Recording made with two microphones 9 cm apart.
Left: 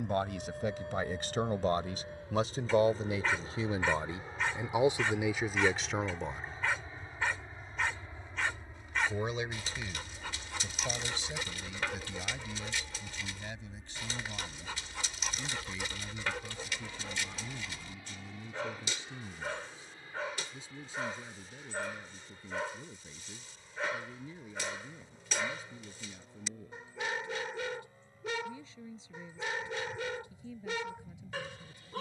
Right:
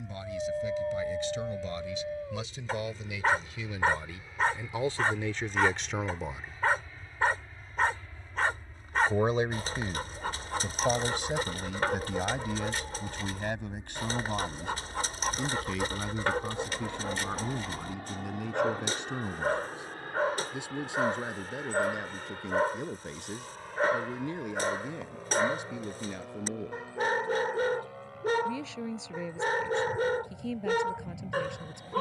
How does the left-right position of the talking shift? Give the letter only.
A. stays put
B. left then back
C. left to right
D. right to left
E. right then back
C.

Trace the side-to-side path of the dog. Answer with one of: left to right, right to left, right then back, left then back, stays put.
stays put.